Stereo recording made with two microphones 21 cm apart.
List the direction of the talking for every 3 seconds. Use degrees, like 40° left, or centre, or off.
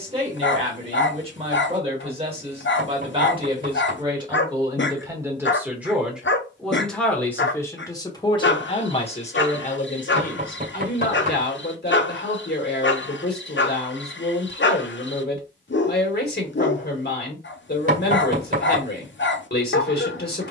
30° right, 20° right, 10° left, 50° left, 50° left, 50° left, 50° left.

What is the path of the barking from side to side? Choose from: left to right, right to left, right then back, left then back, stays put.
stays put.